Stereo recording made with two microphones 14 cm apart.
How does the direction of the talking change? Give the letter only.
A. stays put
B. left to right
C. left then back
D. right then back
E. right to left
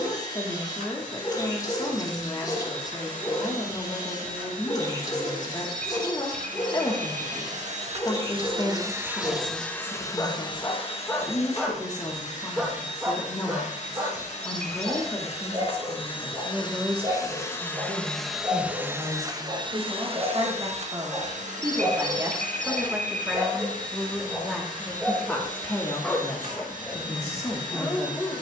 D.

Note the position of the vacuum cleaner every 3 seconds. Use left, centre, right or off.
right, right, right, left, left, left, right, right, right, right.